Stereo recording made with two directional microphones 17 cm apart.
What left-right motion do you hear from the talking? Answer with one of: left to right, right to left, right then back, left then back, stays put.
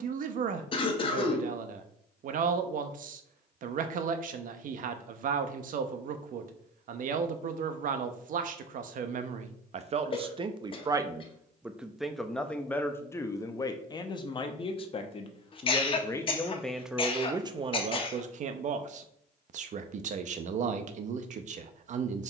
left then back.